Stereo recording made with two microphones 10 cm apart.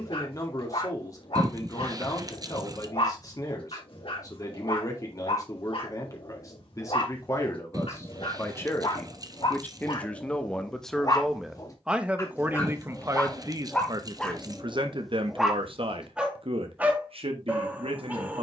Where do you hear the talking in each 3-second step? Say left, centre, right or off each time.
left, left, left, centre, right, right.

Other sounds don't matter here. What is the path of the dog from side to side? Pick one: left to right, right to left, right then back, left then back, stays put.
left to right.